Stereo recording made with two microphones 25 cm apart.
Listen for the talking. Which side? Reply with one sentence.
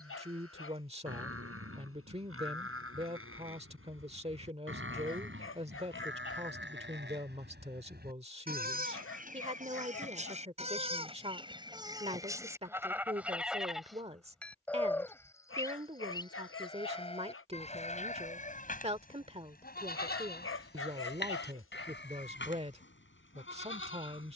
In this clip you hear the talking on the right.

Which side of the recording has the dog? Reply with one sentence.
In this clip you hear the dog on the left.